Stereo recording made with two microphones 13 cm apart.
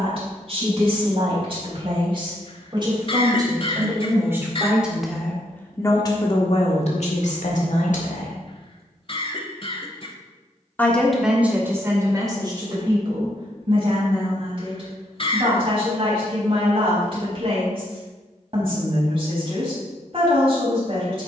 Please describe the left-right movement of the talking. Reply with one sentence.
You can hear the talking move from right to left and back again.